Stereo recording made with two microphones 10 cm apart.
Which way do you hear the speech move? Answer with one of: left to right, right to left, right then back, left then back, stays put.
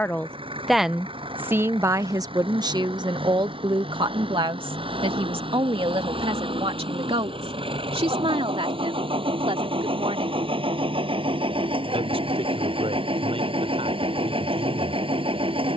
left to right.